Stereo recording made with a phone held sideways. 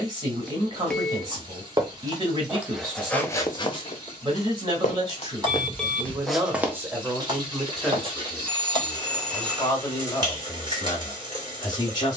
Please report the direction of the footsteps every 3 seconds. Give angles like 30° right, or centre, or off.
20° right, 40° left, 20° right, off.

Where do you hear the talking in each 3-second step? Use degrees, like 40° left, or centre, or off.
30° right, 30° right, 10° right, 30° left.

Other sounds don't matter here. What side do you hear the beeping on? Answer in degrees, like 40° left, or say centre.
10° left.